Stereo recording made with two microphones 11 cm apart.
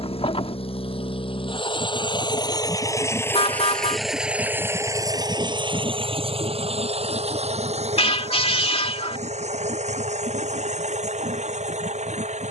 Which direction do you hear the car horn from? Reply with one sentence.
You can hear the car horn on the left.